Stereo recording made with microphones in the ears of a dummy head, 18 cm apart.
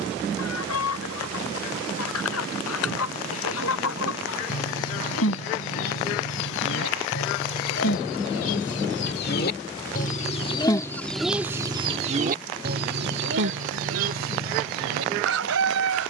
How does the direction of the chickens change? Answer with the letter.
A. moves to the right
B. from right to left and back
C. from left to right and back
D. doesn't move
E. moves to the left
A.